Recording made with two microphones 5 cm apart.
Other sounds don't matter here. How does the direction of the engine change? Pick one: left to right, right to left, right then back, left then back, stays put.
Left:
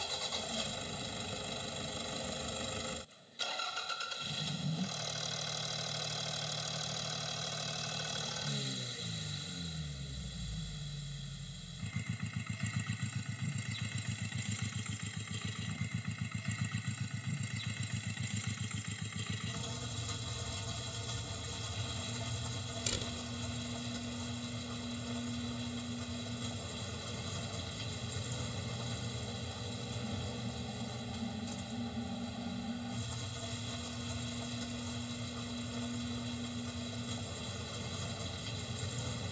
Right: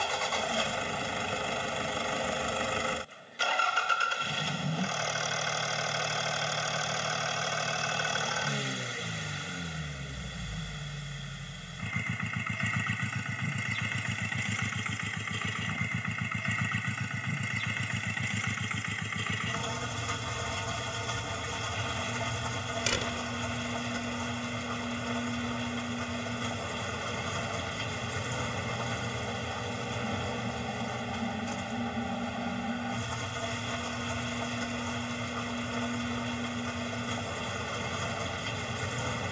stays put.